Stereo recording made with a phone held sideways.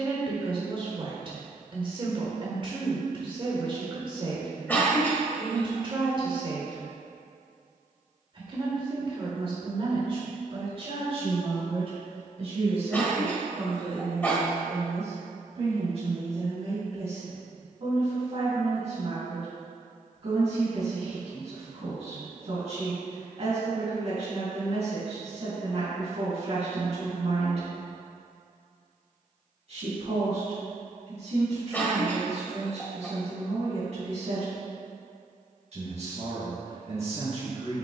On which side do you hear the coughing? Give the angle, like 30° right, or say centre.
10° left.